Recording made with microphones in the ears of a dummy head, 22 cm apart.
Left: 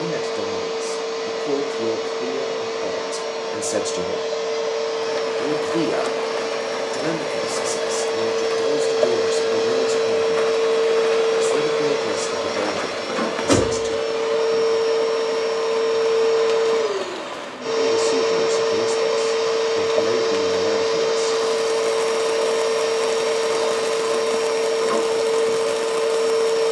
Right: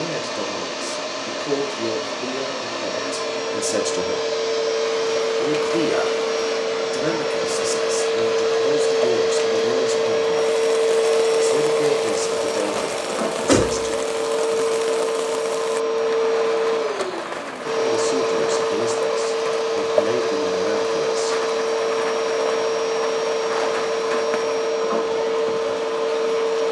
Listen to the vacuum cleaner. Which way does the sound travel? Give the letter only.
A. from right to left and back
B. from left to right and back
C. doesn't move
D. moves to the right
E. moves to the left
E.